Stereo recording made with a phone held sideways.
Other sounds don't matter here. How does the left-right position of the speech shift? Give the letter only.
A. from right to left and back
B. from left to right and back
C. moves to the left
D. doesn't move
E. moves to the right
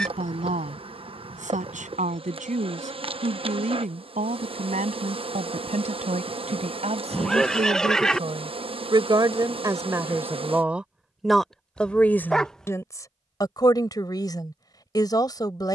C.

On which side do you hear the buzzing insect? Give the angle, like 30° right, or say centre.
40° right.